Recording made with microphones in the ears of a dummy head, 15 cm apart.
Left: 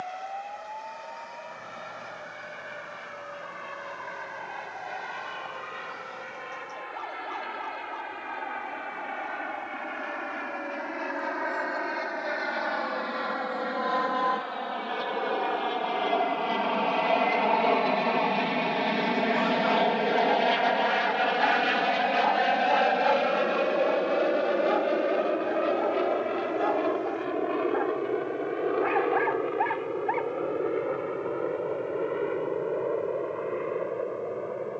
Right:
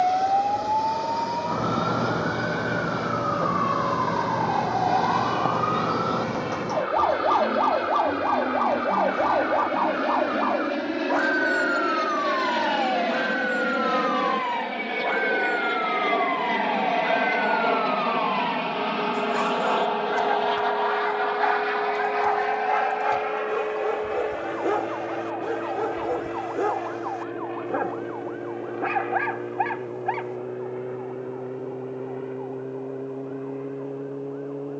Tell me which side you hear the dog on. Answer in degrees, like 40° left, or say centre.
50° right.